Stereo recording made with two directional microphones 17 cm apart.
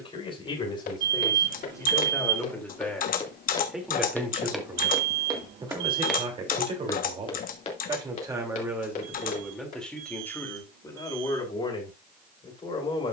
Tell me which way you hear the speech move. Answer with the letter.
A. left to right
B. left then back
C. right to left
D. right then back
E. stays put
D.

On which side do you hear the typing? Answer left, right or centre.
left.